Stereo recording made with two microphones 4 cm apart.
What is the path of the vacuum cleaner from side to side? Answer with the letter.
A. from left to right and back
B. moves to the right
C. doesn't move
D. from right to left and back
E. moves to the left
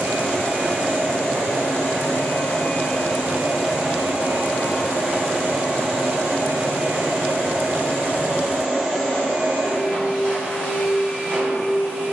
A.